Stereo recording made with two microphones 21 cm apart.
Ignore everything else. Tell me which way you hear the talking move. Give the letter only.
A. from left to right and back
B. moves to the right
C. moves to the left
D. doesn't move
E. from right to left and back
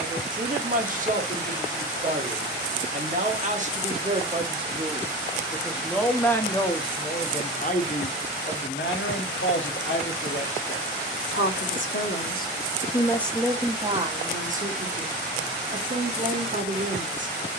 E.